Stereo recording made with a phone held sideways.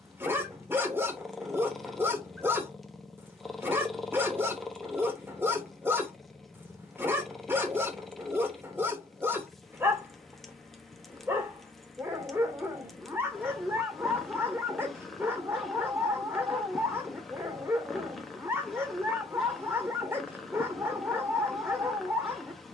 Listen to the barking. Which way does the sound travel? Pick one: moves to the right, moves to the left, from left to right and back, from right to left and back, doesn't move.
doesn't move.